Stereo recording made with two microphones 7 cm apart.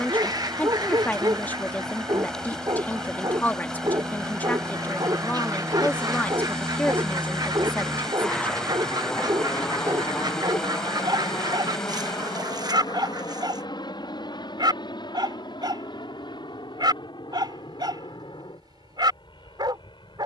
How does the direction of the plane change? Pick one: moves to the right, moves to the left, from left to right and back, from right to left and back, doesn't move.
moves to the left.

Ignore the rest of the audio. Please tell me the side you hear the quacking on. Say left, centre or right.
right.